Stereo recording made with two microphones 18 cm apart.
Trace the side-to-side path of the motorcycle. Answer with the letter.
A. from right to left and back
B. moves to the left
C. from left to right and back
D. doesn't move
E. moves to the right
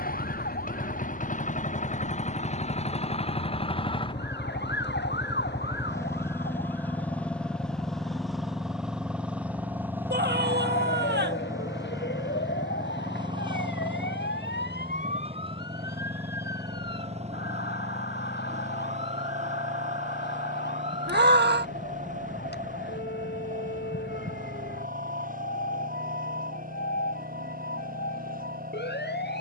E.